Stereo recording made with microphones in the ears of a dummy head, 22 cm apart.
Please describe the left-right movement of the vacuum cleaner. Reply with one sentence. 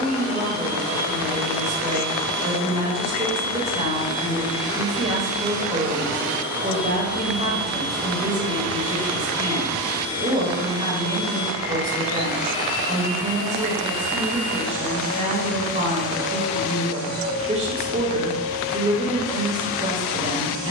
In this clip you hear the vacuum cleaner go from the right side to the left.